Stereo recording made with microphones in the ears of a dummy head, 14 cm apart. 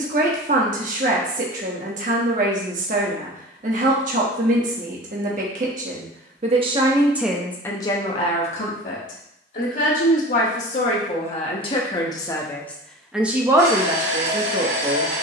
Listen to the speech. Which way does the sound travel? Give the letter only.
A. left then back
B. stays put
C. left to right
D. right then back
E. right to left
A.